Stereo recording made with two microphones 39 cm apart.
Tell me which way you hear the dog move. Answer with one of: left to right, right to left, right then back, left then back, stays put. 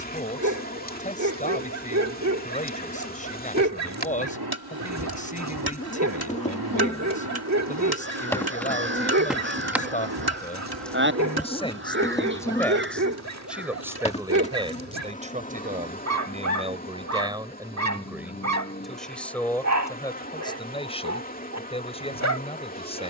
stays put.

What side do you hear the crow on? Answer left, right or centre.
right.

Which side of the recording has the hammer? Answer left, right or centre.
right.